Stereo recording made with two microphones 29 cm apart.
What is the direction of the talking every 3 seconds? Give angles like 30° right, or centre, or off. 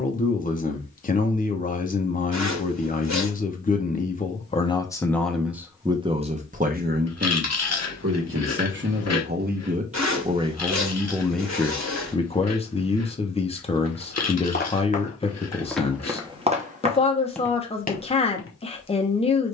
30° left, 20° left, 40° right, 10° right, 20° left, 20° left, 20° left.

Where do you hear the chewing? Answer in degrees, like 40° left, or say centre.
60° left.